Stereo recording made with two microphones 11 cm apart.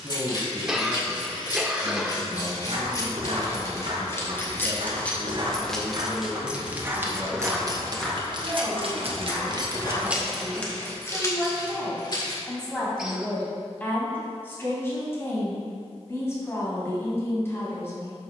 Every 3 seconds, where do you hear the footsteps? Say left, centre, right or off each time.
right, right, centre, left, off, off.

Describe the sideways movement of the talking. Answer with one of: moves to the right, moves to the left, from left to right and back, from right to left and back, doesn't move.
moves to the left.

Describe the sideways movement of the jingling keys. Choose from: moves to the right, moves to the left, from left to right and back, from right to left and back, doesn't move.
from left to right and back.